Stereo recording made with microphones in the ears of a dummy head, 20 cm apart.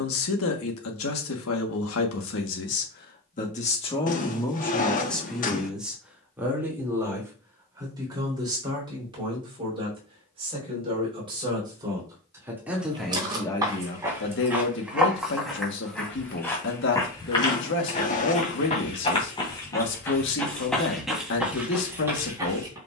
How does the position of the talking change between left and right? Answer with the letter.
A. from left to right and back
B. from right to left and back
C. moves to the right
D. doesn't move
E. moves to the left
A.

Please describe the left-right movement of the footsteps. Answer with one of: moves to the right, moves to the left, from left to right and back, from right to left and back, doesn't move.
from right to left and back.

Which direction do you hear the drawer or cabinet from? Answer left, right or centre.
left.